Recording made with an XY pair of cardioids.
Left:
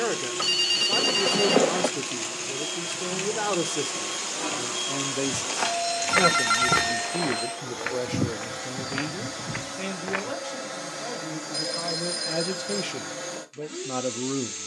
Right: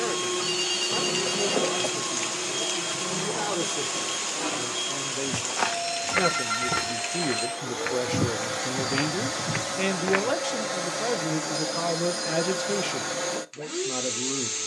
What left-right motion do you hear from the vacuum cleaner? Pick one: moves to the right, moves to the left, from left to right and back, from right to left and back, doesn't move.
from right to left and back.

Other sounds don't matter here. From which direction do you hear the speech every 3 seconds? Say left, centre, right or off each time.
left, left, centre, right, centre.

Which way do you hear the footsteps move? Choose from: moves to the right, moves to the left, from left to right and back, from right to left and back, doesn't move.
from right to left and back.